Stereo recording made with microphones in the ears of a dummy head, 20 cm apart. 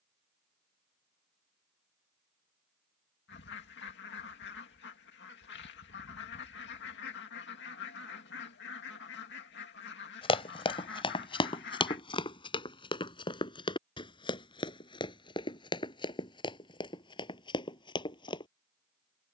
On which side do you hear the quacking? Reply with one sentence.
You can hear the quacking on the left.